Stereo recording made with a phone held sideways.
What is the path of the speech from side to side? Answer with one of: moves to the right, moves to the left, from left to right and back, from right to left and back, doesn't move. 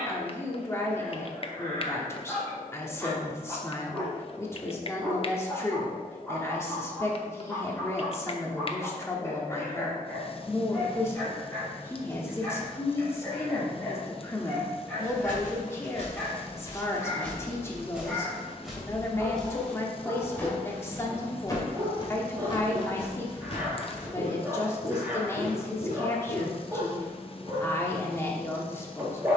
doesn't move.